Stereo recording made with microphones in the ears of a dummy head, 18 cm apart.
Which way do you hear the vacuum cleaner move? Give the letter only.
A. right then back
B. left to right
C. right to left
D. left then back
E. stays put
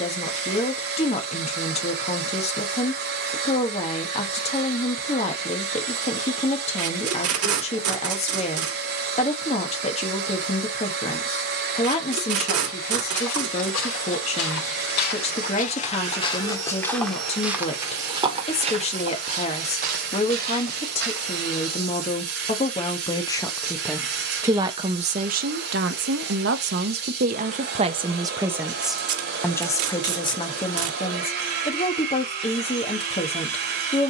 E.